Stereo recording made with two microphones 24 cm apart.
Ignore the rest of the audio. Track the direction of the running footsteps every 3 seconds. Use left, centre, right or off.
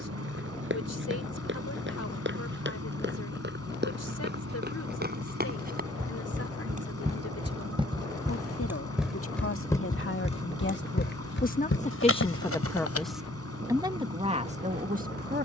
right, right, right, left, left.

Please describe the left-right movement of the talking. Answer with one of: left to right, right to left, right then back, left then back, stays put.
left to right.